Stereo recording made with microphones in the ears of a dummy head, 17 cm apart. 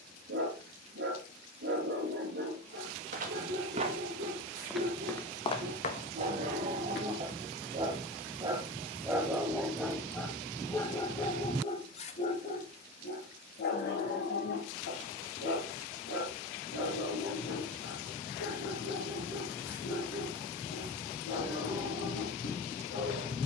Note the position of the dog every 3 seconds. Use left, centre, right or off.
right, right, right, centre, left, left, left, left.